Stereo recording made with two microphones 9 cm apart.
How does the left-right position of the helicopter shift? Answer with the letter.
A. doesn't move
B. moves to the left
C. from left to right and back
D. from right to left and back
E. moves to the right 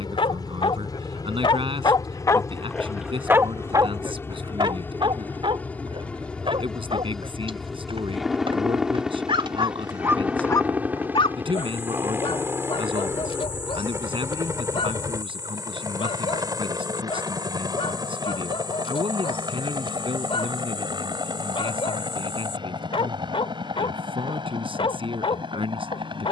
E.